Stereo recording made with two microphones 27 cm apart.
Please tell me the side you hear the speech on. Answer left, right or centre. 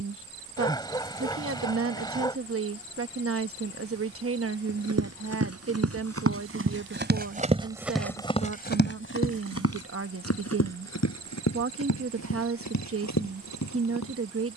right.